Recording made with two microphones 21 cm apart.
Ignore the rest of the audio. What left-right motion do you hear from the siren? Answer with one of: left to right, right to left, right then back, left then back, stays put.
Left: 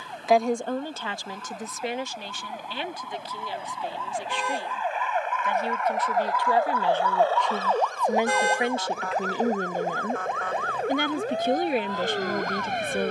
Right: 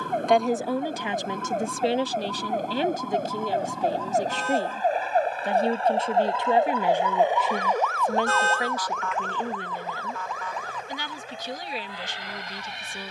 right to left.